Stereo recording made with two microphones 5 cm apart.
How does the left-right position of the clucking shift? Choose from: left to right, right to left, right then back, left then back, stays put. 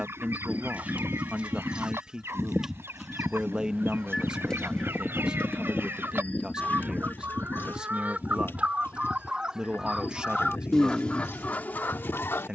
right to left.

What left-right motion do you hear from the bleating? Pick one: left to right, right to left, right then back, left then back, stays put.
right to left.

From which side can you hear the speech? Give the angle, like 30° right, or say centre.
20° right.